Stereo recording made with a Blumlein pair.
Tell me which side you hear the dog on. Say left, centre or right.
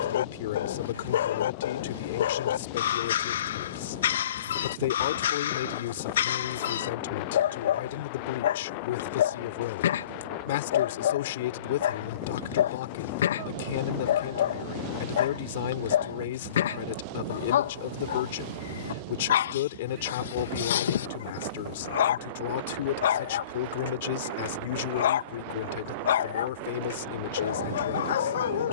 left.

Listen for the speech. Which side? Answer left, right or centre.
left.